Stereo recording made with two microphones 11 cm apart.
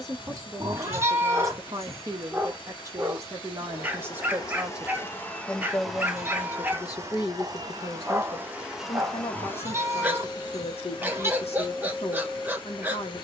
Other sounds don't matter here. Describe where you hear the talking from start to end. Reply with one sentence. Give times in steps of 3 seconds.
In this clip you hear the talking on the right from 0 s, in the centre from 3 s and on the left from 6 s.